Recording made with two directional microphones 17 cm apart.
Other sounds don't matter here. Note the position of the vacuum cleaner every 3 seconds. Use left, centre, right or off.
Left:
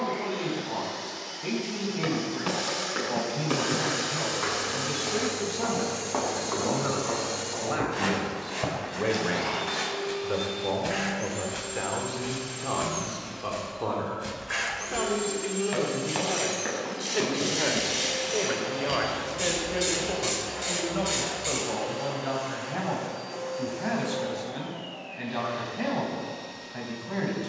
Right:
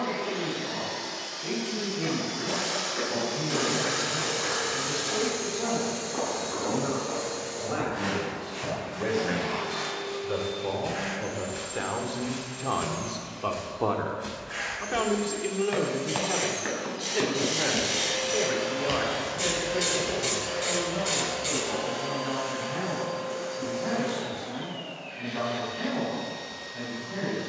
right, right, left, left, left, left, right, right, right.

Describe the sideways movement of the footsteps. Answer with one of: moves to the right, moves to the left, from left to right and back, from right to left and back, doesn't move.
moves to the right.